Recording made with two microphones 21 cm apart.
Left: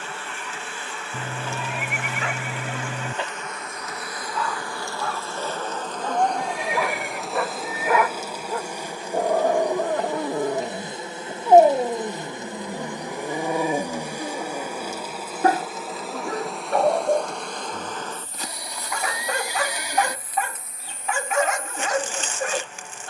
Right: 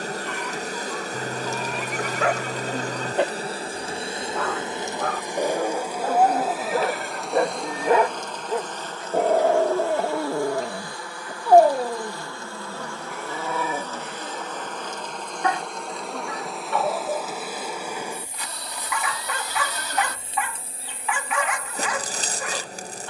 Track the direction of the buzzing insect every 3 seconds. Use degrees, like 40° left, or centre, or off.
40° right, 20° right, centre, 20° left, 10° left, centre, 20° right, 40° right.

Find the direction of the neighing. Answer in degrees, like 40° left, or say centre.
10° left.